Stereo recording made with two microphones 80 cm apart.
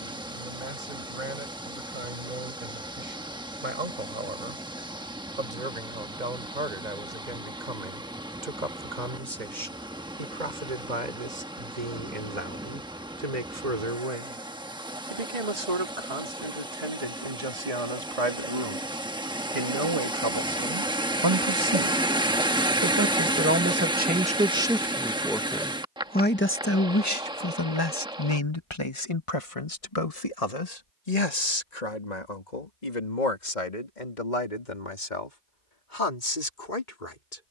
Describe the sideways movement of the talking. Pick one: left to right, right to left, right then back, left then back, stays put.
right to left.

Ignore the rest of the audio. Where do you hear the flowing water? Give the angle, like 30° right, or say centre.
10° right.